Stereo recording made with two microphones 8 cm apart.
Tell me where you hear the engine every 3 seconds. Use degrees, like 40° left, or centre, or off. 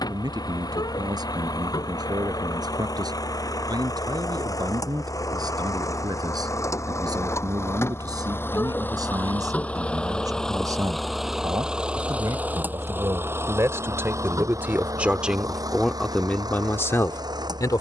60° left, 50° left, 40° left, 10° left, 30° right, 60° right.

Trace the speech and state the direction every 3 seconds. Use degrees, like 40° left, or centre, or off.
60° right, 60° right, 60° right, 60° right, 40° right, 20° left.